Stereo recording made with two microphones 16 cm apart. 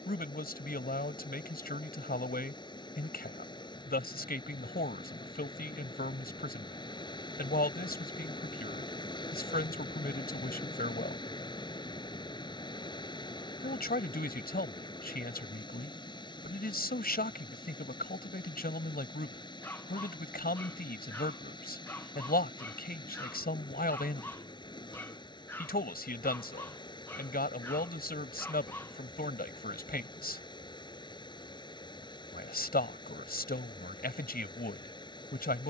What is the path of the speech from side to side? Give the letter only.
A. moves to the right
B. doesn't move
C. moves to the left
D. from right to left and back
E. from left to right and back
B.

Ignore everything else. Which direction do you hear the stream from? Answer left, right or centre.
left.